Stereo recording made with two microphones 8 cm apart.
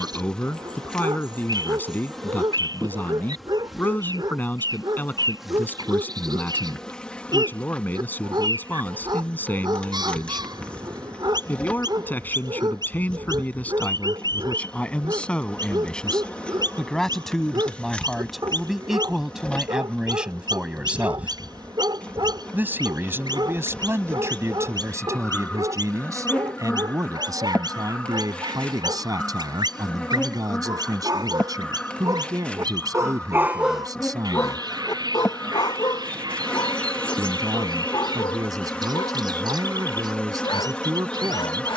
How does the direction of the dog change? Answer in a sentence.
In this clip you hear the dog move from right to left.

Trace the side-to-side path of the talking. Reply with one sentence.
In this clip you hear the talking move from left to right.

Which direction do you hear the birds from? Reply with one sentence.
In this clip you hear the birds on the right.